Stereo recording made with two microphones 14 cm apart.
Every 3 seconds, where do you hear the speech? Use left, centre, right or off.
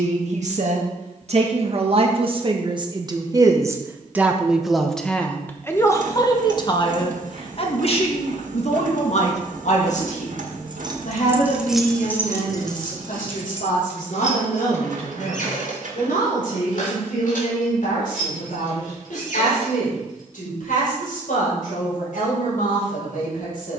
right, centre, left, left, left, left, left, left.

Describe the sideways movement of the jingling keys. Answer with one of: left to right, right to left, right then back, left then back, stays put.
right to left.